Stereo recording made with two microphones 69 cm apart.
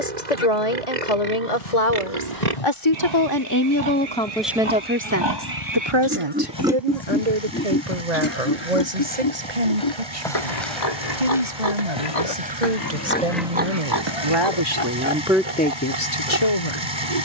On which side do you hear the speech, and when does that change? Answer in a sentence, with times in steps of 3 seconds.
You can hear the speech on the left from 0 s, in the centre from 3 s, on the right from 6 s and on the left from 15 s.